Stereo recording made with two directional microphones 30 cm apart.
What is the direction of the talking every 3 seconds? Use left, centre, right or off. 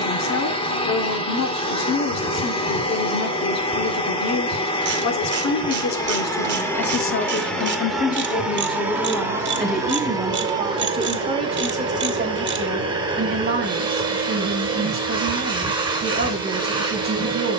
left, left, left, centre, right, right.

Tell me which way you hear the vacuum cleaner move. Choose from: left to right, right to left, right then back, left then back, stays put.
left to right.